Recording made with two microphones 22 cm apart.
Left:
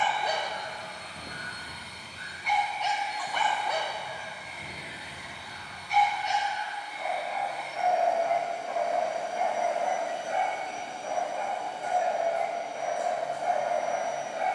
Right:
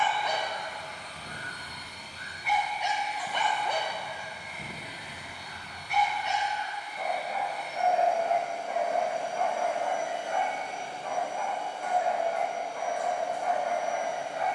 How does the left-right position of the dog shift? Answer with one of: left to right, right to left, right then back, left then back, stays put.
right then back.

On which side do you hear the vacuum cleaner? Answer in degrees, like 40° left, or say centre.
10° left.